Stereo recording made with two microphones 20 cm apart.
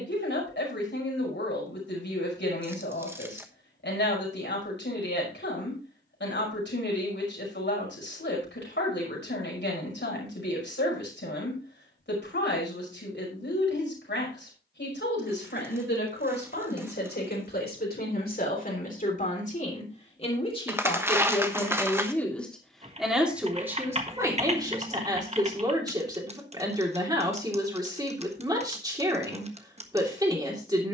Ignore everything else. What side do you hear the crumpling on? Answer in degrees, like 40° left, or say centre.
10° right.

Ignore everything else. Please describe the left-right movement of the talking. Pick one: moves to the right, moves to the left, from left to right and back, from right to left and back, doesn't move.
moves to the right.